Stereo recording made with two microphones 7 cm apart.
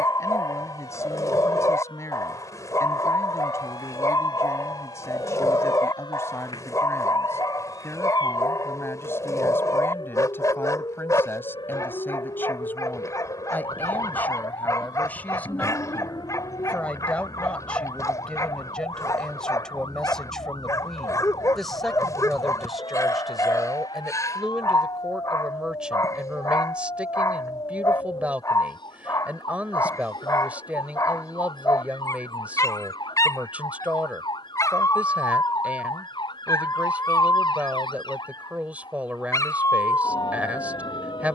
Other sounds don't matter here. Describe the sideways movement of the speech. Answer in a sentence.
In this clip you hear the speech move to the right.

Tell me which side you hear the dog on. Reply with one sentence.
In this clip you hear the dog on the left.